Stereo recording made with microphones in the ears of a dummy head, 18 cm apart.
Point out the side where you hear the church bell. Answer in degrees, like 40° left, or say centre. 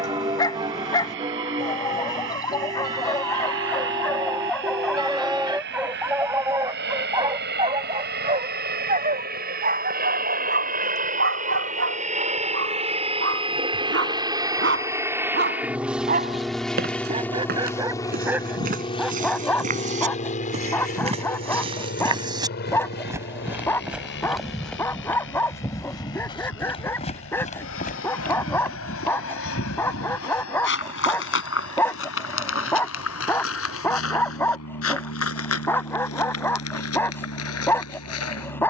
20° right.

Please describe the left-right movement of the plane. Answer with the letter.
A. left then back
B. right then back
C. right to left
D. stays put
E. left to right
C.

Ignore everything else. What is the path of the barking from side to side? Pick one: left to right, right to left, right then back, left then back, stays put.
right then back.